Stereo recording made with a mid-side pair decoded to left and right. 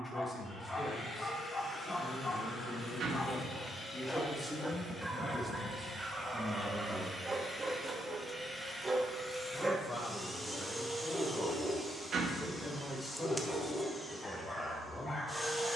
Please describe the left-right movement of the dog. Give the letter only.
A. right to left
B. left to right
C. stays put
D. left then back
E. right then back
E.